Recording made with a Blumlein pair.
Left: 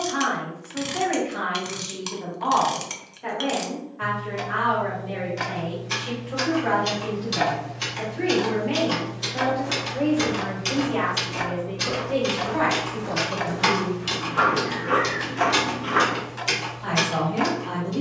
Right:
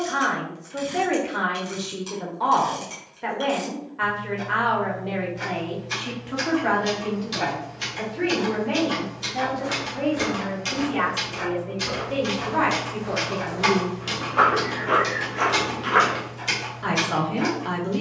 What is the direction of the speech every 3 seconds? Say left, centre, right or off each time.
right, right, centre, centre, centre, right.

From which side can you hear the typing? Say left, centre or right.
centre.